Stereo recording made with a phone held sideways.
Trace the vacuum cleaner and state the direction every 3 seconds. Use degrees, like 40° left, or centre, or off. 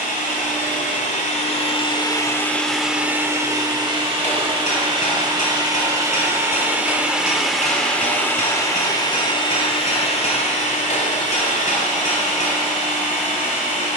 40° left, 30° right, centre, 50° left, 60° left.